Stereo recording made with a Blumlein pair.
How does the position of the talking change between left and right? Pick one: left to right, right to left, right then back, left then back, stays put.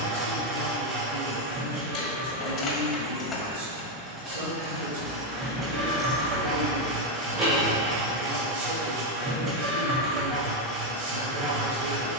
stays put.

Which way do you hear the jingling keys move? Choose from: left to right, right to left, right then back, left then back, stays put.
left to right.